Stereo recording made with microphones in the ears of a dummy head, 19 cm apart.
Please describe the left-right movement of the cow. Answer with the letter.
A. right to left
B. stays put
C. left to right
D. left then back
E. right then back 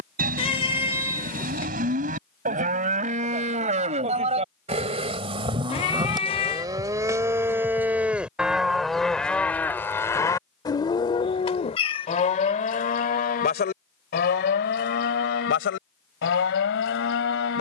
A.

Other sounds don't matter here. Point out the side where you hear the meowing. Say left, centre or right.
left.